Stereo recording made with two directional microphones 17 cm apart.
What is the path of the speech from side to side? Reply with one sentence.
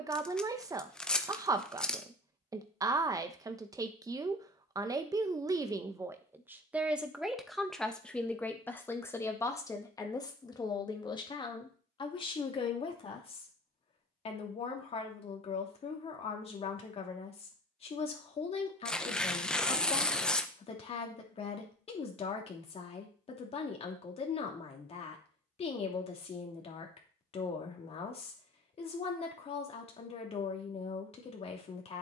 You can hear the speech move from right to left.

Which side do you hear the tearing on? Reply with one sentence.
You can hear the tearing in the centre.